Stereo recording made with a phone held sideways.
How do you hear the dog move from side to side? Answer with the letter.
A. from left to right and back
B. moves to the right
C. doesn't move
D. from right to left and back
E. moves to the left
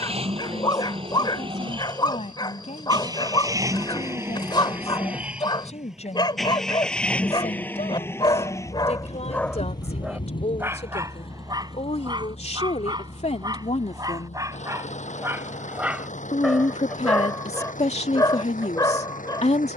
A.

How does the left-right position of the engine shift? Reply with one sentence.
In this clip you hear the engine move from right to left.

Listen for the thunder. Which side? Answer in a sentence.
In this clip you hear the thunder on the left.